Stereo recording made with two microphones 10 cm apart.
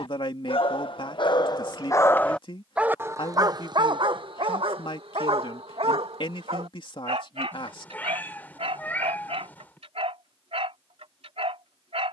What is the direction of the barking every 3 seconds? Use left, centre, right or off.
left, right, right, right.